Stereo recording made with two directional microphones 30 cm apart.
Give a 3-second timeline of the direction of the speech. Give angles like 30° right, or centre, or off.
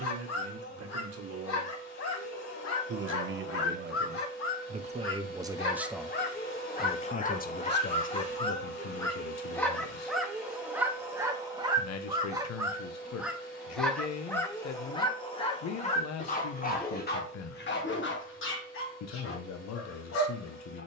50° right, 30° right, 30° left, 60° left, 60° left, 60° left, 60° left.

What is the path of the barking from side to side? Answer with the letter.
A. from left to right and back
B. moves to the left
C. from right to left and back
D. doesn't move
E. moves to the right
A.